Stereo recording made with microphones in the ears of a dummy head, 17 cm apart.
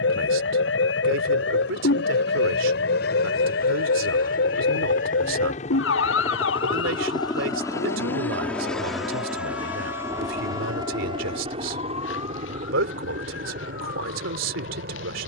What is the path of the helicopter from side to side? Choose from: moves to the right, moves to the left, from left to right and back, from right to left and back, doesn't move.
moves to the right.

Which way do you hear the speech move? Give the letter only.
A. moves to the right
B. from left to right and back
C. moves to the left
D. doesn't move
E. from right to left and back
D.